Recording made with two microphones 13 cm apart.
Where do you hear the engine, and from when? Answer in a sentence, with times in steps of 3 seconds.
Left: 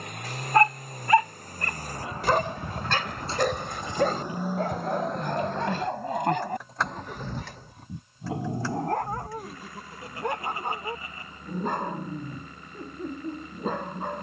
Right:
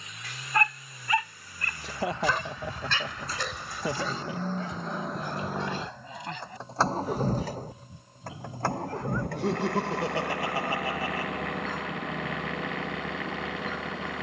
In this clip you hear the engine on the left from 0 s, in the centre from 3 s and on the right from 6 s.